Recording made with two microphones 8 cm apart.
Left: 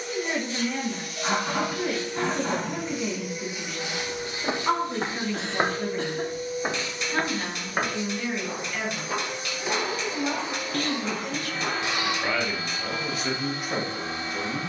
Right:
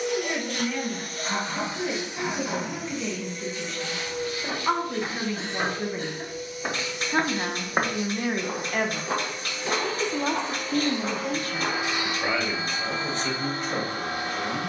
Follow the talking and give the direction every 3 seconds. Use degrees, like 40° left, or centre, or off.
10° left, centre, 40° right, 50° right, 10° left.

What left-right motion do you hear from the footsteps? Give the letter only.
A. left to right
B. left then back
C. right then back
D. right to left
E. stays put
A.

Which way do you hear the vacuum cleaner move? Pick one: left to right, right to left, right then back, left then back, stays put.
left then back.